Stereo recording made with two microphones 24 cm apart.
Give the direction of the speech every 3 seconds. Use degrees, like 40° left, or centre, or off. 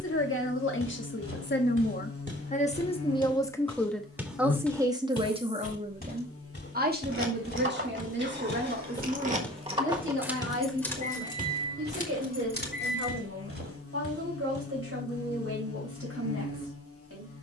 50° left, 10° right, 40° right, 60° right, 60° right, 70° right.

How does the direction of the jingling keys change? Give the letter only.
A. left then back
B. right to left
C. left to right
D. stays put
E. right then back
B.